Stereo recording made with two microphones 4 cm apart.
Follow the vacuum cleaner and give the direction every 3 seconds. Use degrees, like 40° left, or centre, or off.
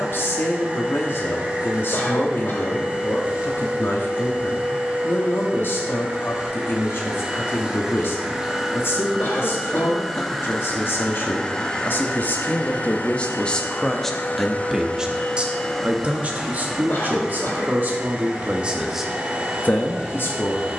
30° right, 30° right, 20° right, 10° left, 30° left, centre, 20° right.